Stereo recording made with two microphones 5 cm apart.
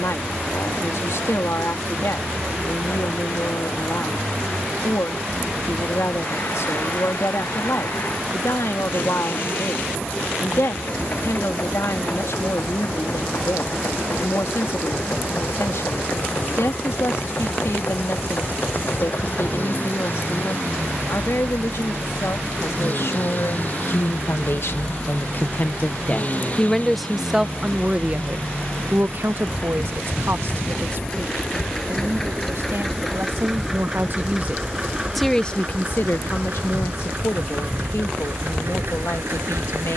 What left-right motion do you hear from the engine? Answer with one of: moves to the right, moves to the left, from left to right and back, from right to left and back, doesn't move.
moves to the right.